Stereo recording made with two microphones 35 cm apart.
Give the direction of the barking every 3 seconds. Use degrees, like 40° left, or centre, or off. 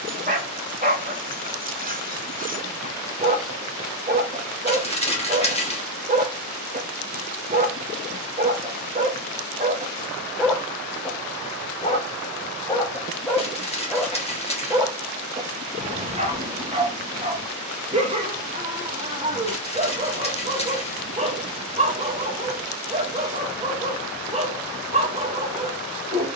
20° right, 20° right, 20° right, 10° right, centre, 20° right, 20° right, 20° right, 20° right.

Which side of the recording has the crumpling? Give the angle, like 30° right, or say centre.
20° left.